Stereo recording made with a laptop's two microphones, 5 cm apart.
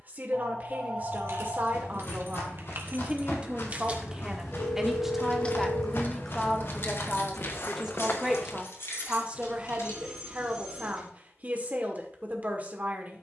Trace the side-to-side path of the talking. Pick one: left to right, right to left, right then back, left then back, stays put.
left then back.